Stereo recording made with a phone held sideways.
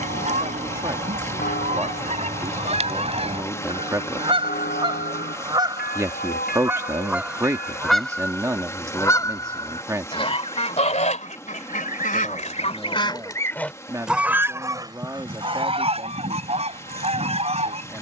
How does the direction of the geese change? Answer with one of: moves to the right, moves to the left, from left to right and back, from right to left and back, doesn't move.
from right to left and back.